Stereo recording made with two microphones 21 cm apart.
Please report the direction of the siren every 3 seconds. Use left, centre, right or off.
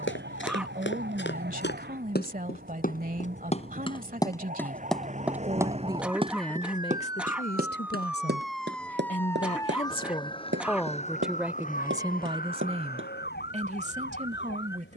right, right, centre, left, left.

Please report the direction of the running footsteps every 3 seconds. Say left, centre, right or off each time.
left, centre, right, right, right.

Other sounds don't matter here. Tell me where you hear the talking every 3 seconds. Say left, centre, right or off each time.
right, right, left, centre, right.